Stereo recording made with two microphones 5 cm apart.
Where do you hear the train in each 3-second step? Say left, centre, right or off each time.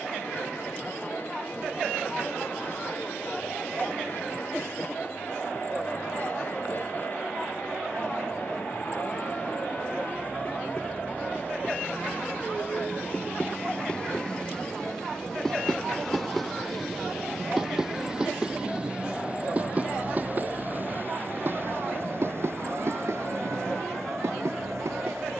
left, left, left, left, left, centre, right, right, right.